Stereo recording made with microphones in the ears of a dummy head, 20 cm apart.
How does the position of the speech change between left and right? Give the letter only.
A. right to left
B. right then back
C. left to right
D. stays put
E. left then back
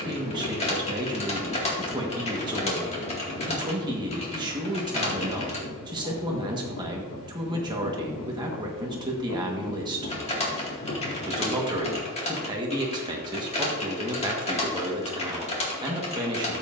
D.